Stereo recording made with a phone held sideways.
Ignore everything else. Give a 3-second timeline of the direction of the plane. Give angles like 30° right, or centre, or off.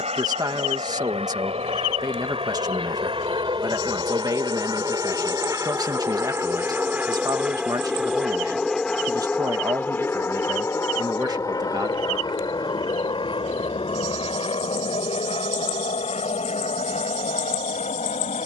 50° right, 30° right, 10° right, 20° left, 40° left, 50° left.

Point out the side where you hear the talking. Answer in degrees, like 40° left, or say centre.
30° right.